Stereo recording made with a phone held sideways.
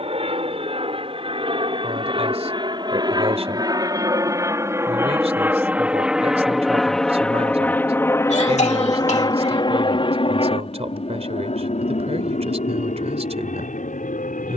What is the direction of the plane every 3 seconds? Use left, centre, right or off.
right, right, centre, left, left.